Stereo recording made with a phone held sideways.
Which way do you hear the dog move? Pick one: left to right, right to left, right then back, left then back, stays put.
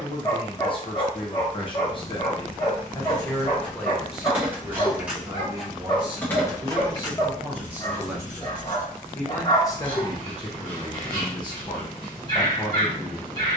stays put.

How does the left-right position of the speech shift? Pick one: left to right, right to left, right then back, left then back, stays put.
right then back.